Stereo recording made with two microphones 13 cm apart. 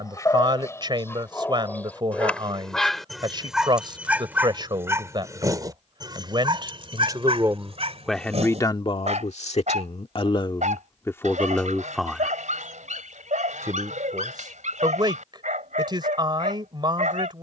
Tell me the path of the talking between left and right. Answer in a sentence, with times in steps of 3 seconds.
You can hear the talking on the right from 0 s, in the centre from 6 s, on the left from 9 s and on the right from 12 s.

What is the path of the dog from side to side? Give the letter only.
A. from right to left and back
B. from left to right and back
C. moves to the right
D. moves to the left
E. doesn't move
C.